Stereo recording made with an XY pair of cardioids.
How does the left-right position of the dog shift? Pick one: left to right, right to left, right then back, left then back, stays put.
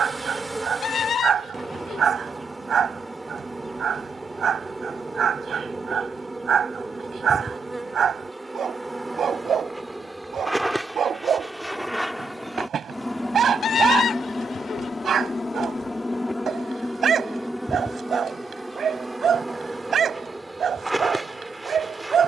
stays put.